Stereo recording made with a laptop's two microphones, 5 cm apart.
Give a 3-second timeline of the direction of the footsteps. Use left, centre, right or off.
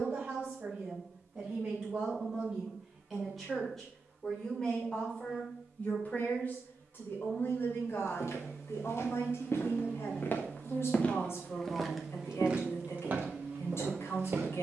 off, off, left, left, right.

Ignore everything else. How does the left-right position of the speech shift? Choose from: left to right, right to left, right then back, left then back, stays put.
right to left.